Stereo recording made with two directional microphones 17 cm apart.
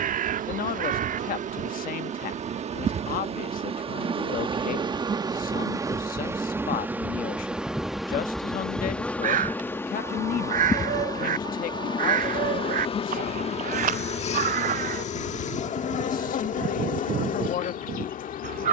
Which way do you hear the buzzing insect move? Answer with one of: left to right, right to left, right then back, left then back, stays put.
right to left.